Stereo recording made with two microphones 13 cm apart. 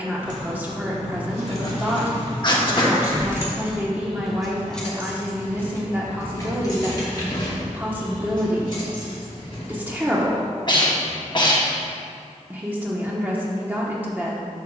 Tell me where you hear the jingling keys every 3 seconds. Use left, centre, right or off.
right, centre, left, left, off.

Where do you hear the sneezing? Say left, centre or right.
left.